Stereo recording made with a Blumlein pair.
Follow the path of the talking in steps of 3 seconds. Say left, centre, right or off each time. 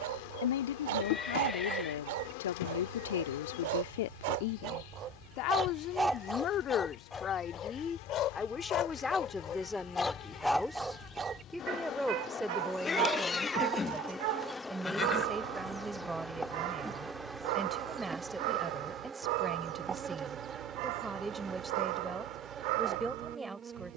left, left, left, centre, centre, centre, centre, centre.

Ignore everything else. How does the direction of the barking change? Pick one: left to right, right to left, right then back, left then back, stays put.
left then back.